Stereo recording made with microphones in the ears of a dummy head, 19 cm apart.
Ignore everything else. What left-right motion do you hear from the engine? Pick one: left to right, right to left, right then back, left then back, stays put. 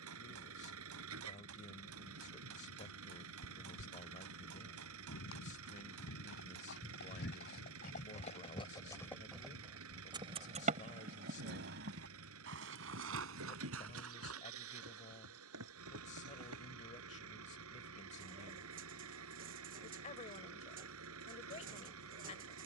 stays put.